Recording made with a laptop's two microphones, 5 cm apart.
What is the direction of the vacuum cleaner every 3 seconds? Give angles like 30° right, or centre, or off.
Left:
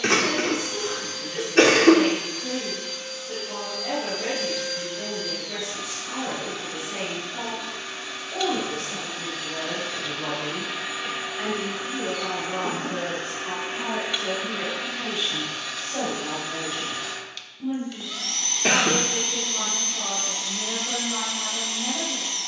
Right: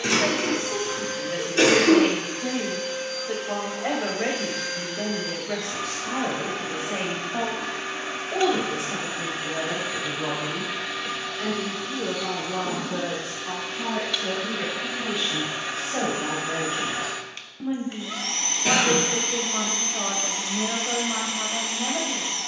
30° right, 30° right, 30° right, 10° right, 20° left, 20° right, 30° right, 30° right.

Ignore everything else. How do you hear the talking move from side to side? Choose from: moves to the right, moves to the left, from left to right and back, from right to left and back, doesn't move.
from right to left and back.